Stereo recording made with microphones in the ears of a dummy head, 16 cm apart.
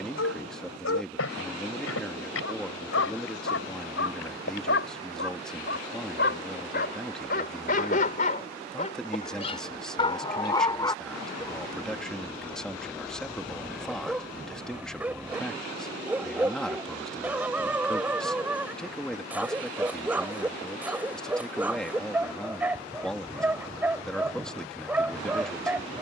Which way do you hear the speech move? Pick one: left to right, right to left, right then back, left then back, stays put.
stays put.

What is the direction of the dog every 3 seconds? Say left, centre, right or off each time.
left, left, left, left, centre, centre, centre, centre, centre.